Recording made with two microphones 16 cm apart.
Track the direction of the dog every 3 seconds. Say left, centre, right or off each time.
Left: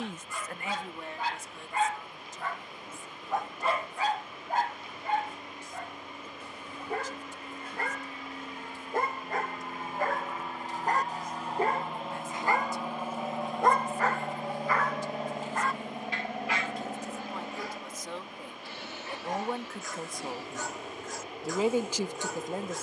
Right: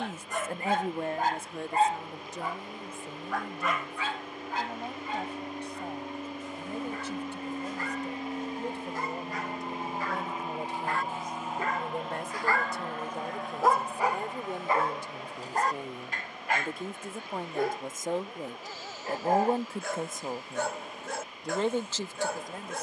right, left, left, left, centre, right, right, right.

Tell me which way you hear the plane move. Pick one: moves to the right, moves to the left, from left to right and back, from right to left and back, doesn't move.
moves to the left.